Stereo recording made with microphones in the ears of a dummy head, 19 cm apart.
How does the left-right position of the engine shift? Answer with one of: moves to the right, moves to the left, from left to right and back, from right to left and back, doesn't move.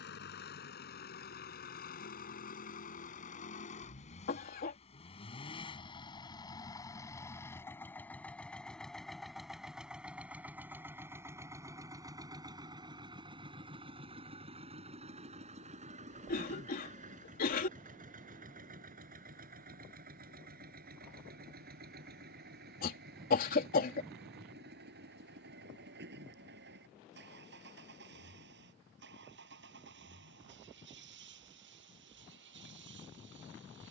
moves to the right.